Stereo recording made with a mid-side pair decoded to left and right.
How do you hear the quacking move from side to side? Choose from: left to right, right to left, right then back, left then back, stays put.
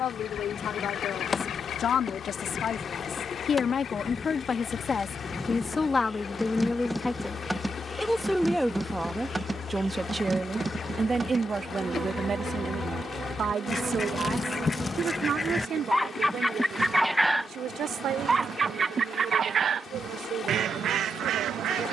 left to right.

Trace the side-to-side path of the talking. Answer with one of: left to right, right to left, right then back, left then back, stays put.
left to right.